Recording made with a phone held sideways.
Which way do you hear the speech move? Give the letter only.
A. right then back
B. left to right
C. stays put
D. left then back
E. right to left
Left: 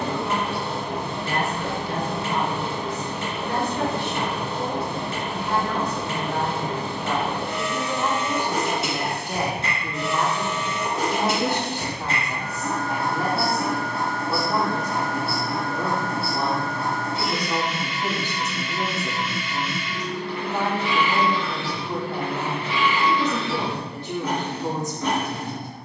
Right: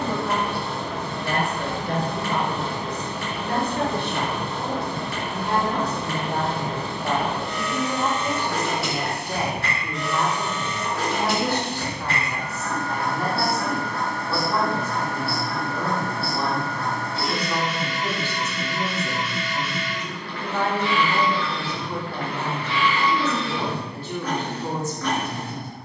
E.